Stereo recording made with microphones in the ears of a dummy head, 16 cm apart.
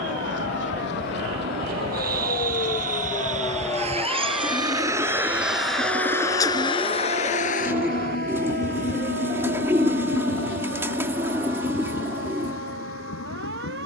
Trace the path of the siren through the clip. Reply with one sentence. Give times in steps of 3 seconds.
In this clip you hear the siren on the left from 0 s, in the centre from 3 s and on the right from 6 s.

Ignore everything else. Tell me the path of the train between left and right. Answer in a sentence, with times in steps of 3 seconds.
In this clip you hear the train on the right from 0 s and on the left from 6 s.